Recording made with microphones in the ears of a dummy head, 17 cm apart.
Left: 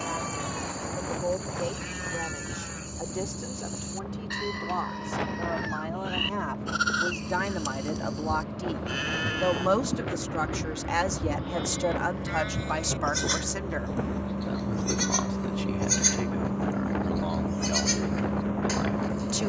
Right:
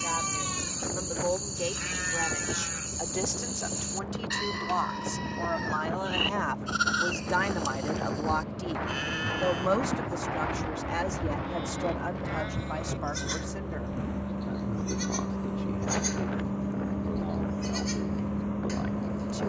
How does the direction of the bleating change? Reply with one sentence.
You can hear the bleating go from the right side to the left.